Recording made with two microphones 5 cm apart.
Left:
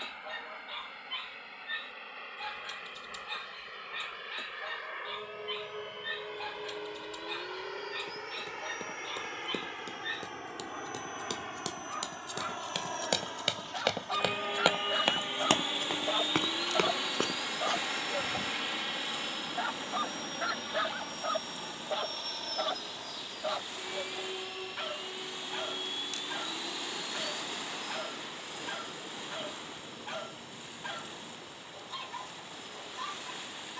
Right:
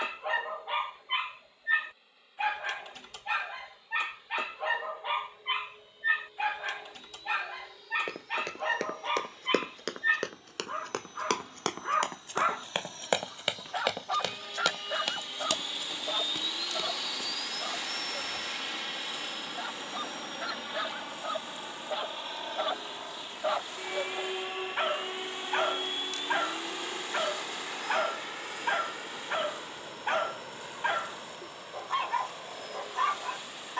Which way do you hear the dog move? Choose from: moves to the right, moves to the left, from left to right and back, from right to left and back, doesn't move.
from right to left and back.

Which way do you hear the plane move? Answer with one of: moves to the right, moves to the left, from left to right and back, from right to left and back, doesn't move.
moves to the right.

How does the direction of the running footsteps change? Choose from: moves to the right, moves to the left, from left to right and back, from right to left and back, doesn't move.
moves to the left.